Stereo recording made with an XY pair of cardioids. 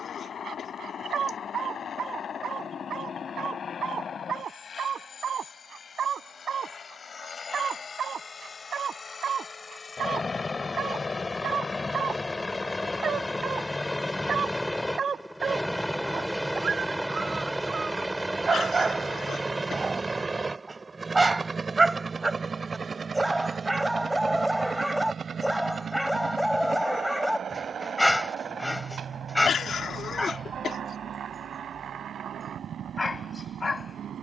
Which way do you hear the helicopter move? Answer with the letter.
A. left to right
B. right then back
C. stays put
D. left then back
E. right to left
A.